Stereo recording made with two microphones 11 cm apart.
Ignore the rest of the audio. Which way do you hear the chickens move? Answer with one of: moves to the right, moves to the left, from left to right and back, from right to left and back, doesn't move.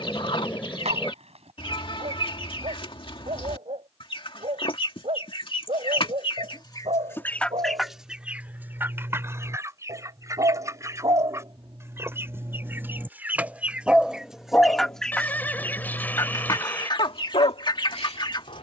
from left to right and back.